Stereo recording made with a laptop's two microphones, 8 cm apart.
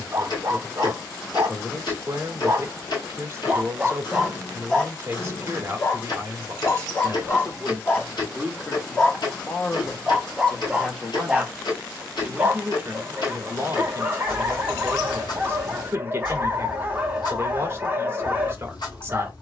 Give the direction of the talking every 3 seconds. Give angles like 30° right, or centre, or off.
30° right, 30° right, 20° right, 10° left, 30° right, 30° right, 30° right.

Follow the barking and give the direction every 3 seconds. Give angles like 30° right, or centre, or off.
30° right, centre, 30° left, 10° right, 20° right, 20° right, 20° right.